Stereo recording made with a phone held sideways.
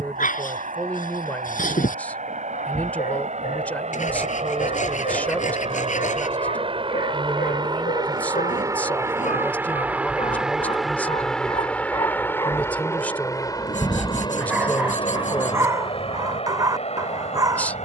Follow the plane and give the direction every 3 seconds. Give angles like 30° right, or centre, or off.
70° right, 50° right, 30° right, centre, 20° left, 40° left.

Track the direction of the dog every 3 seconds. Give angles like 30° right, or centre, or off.
70° left, 70° left, 70° left, 50° left, 10° left, 20° right.